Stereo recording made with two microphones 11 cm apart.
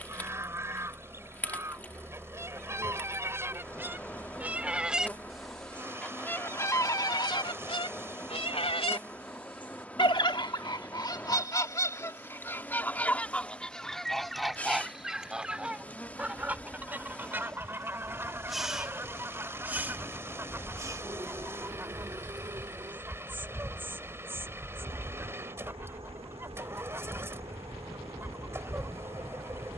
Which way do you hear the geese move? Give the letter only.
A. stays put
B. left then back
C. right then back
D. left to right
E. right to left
B.